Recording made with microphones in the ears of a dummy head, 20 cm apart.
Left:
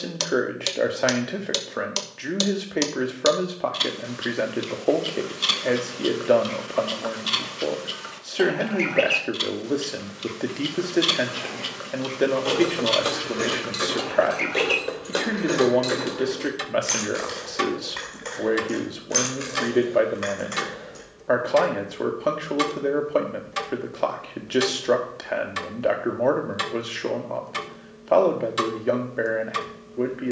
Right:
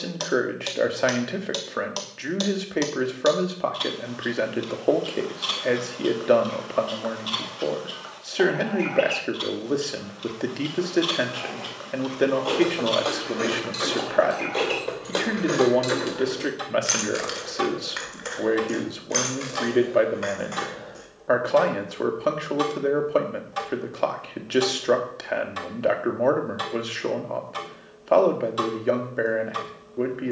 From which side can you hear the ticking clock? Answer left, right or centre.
left.